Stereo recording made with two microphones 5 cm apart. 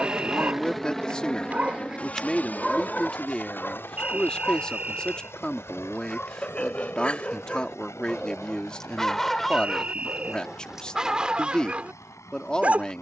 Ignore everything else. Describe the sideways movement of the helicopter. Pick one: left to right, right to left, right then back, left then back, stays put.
right to left.